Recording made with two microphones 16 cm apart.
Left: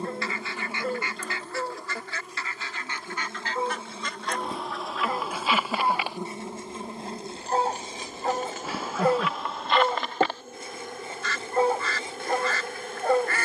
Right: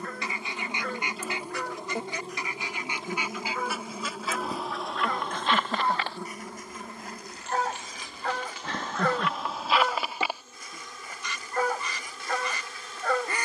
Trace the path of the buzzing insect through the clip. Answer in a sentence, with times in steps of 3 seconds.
In this clip you hear the buzzing insect in the centre from 0 s and on the left from 6 s.